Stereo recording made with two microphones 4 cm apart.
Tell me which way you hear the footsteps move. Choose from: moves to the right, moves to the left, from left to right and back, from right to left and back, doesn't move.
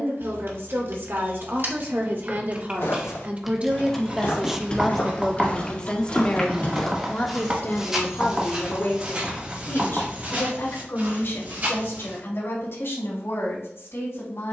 moves to the right.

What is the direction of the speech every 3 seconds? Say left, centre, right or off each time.
right, centre, left, left, left.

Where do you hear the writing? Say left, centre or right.
right.